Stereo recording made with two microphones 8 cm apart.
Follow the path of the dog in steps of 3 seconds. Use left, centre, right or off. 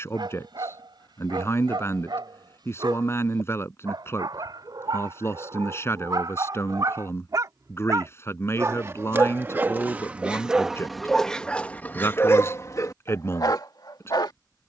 right, right, right, centre, left.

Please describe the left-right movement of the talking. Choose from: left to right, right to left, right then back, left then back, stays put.
stays put.